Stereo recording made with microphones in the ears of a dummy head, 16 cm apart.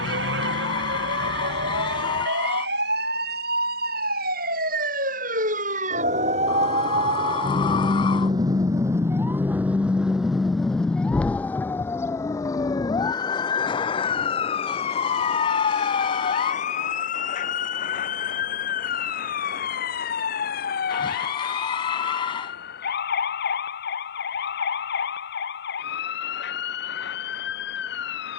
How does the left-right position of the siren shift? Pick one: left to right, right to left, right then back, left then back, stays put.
right to left.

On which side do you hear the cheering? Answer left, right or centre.
left.